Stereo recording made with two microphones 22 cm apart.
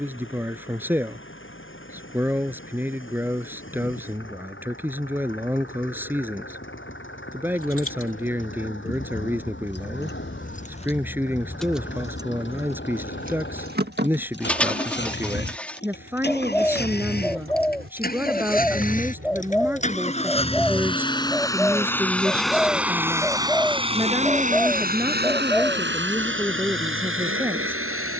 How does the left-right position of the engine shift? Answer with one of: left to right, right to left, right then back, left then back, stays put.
left to right.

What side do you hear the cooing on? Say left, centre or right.
centre.